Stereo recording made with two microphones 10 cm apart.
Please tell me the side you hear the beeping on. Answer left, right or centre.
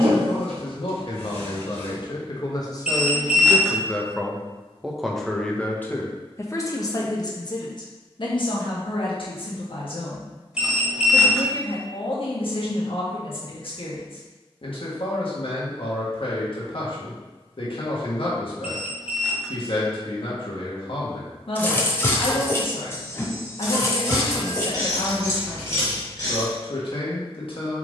centre.